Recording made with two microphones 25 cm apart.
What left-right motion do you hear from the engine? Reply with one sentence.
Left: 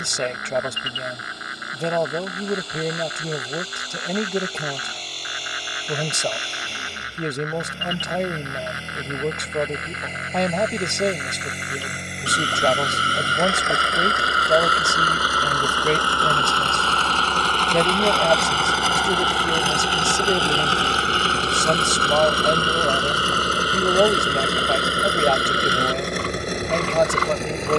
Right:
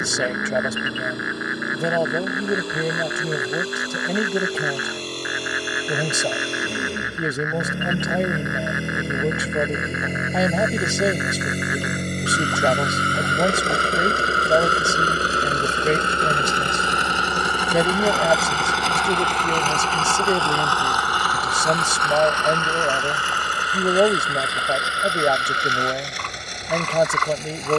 In this clip you hear the engine go from the right side to the left.